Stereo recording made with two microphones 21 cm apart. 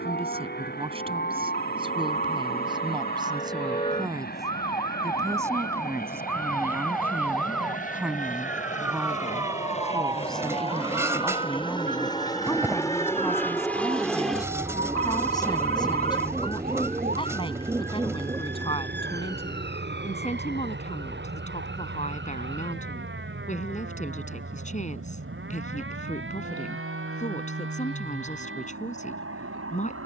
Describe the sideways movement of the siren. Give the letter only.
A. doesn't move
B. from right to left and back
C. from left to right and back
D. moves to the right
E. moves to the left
D.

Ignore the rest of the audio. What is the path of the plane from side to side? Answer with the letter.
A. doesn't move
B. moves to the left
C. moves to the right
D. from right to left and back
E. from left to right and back
C.